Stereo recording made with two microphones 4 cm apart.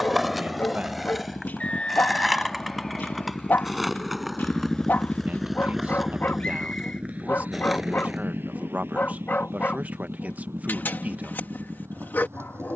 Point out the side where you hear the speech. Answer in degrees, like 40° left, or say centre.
40° right.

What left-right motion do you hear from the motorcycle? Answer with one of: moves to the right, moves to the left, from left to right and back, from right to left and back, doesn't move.
moves to the right.